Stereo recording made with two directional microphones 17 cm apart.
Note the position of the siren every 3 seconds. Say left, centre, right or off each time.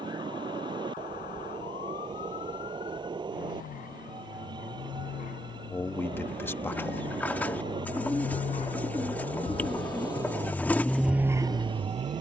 left, left, left, centre.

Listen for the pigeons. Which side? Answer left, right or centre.
centre.